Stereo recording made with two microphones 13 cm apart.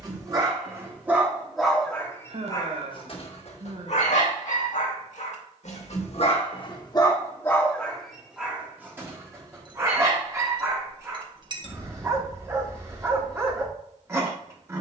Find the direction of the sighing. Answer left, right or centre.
right.